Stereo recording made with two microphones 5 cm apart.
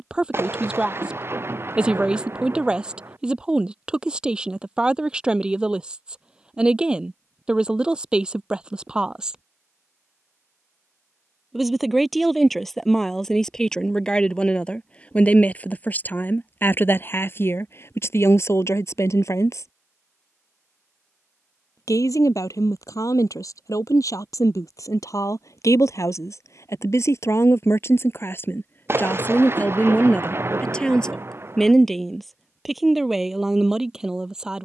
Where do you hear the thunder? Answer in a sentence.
In this clip you hear the thunder on the right.